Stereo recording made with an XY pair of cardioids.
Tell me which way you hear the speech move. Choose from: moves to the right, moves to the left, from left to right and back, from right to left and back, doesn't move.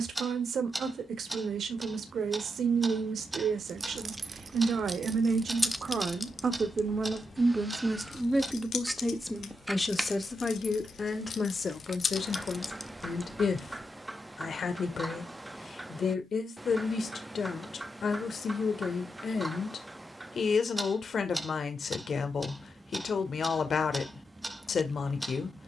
moves to the left.